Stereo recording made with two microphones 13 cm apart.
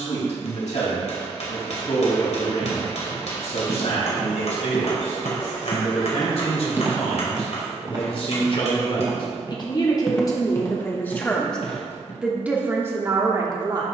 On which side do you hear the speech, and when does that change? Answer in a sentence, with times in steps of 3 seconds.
You can hear the speech on the left from 0 s and on the right from 12 s.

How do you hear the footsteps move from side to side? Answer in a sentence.
You can hear the footsteps go right and come back.